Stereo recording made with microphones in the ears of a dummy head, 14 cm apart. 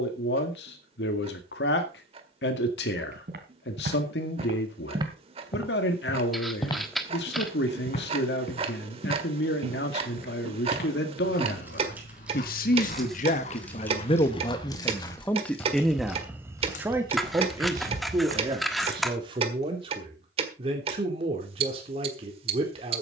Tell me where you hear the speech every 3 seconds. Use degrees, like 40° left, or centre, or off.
80° left, 80° left, 80° left, 80° left, 40° left, 10° right, 30° right, 40° right.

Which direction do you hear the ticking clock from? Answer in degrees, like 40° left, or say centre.
40° right.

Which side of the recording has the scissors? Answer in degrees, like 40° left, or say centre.
centre.